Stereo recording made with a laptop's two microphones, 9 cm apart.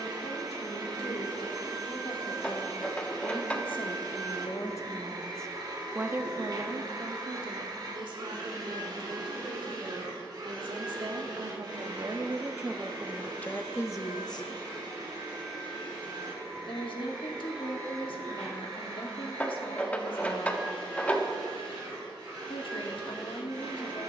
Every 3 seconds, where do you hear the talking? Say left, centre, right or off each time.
left, left, right, right, centre, left, left, left.